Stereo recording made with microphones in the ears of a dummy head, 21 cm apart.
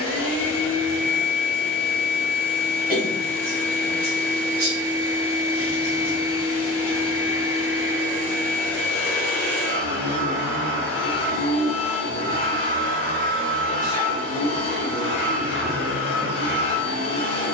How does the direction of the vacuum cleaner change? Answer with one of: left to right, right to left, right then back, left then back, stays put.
stays put.